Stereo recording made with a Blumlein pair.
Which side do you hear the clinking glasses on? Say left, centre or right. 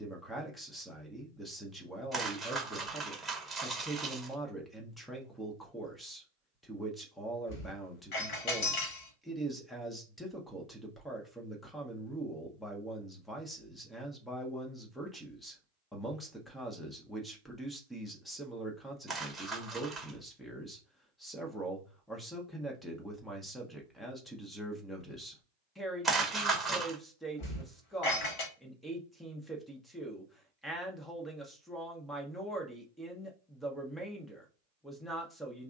left.